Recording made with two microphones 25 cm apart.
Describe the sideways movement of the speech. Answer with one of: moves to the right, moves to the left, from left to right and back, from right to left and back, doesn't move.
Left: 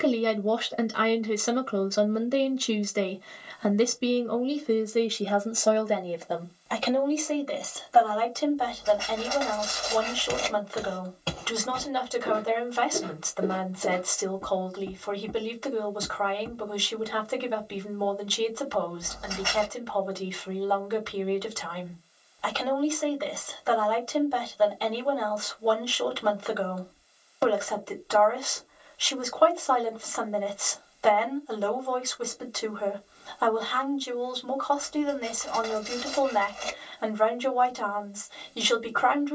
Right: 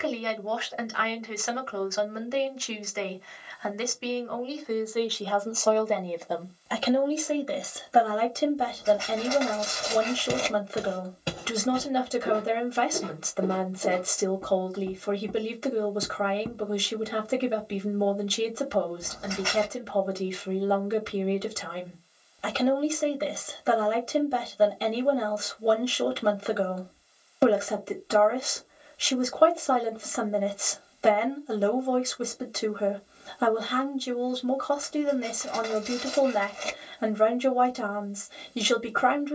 moves to the right.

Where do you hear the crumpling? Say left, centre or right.
right.